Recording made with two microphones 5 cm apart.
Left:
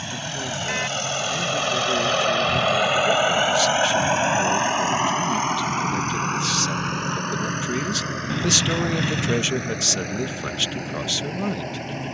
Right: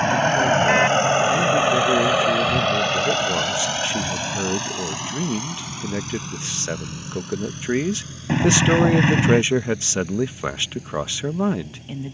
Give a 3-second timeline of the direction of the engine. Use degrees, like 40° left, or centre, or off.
20° right, 30° left, 60° left, 60° left.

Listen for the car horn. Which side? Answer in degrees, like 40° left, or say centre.
40° right.